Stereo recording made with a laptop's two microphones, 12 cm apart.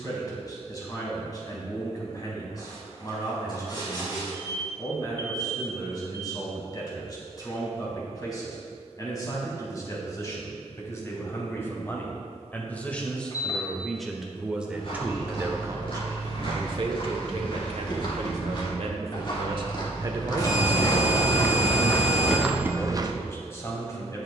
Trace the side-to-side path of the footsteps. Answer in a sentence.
In this clip you hear the footsteps move to the right.